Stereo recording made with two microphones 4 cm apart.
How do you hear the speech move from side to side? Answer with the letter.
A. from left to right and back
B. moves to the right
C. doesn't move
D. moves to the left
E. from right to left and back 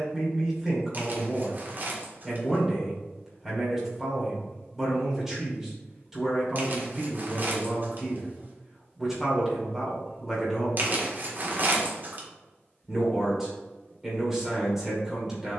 C.